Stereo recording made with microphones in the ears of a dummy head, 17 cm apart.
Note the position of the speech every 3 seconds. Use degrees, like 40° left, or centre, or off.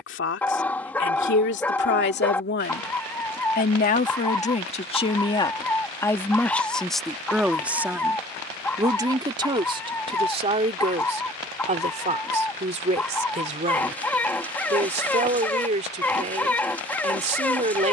60° left, 30° left, centre, 30° right, 40° right, 40° right.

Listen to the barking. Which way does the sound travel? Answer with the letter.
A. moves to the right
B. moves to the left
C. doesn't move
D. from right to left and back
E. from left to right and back
C.